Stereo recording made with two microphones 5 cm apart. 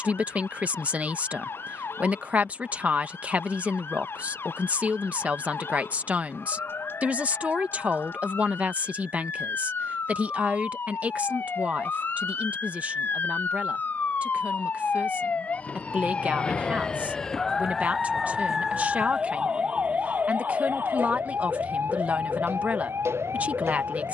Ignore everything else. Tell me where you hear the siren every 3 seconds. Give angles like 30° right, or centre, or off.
60° left, 60° left, 50° left, 50° left, 40° left, 20° left, 30° right, 70° right.